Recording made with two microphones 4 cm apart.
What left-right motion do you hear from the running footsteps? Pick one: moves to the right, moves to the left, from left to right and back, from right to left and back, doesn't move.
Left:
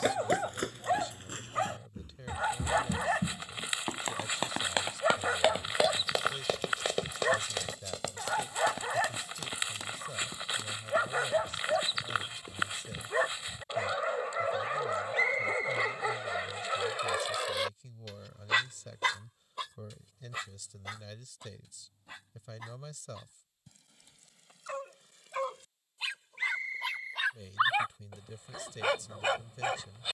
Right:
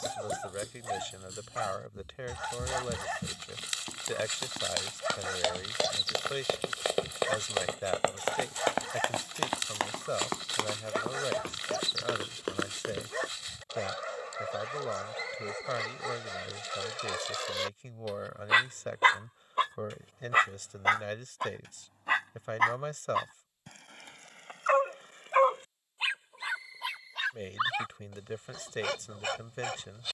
moves to the right.